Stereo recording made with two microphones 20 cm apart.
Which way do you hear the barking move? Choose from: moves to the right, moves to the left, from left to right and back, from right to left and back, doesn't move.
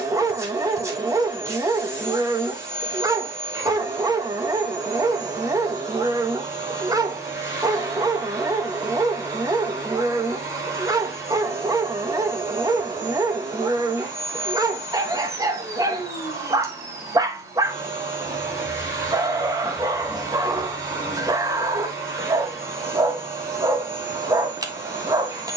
doesn't move.